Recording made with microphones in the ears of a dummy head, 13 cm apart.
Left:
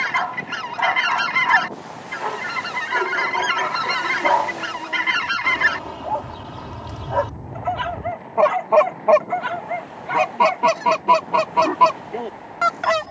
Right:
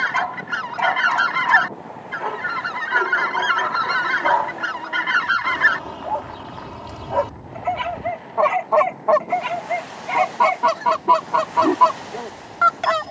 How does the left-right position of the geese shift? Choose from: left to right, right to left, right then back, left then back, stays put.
stays put.